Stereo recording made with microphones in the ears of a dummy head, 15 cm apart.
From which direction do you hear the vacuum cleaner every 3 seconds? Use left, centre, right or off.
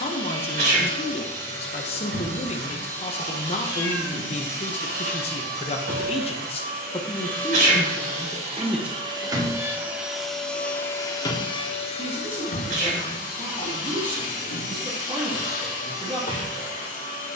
right, right, right, centre, left, left.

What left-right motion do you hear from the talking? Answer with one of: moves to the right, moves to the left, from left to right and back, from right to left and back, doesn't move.
moves to the right.